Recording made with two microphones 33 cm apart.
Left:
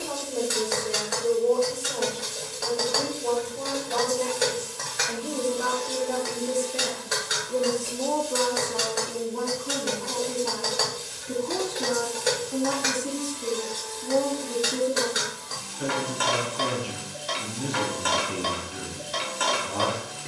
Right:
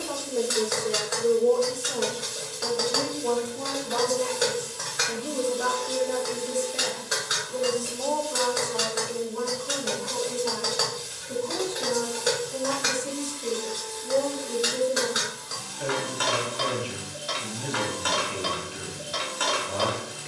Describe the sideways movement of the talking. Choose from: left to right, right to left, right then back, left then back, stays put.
right to left.